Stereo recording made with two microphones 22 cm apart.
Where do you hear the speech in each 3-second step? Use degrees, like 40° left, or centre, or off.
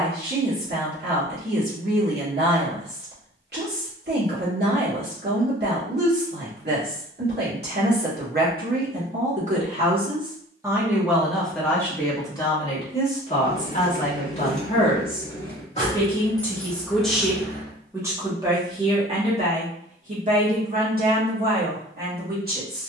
50° right, 50° right, 50° right, 10° right, 30° left, 10° left, 30° right, 50° right.